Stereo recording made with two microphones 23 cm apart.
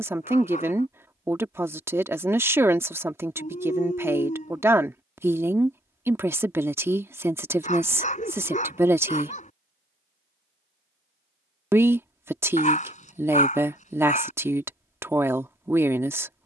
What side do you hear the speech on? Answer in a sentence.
In this clip you hear the speech in the centre.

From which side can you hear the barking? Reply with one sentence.
In this clip you hear the barking on the left.